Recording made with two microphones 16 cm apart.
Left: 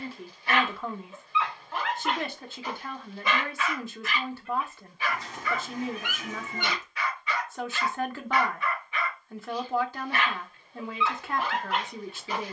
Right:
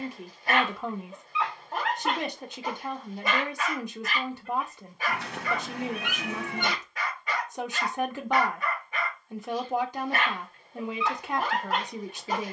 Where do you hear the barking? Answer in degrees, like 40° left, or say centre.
40° right.